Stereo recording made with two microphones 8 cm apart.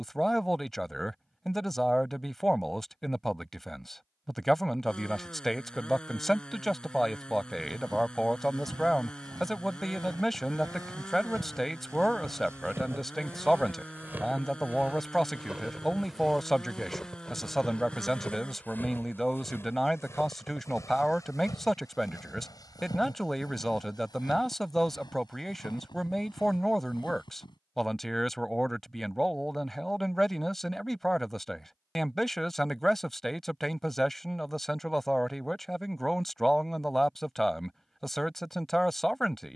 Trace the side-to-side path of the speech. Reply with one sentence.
You can hear the speech stay put.